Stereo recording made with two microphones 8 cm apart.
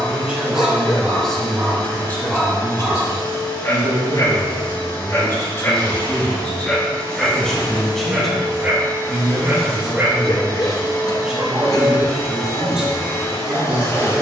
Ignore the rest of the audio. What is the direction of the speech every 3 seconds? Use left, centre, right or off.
centre, left, centre, centre, centre.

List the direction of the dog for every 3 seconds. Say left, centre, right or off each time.
centre, left, centre, right, right.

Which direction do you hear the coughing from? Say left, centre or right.
left.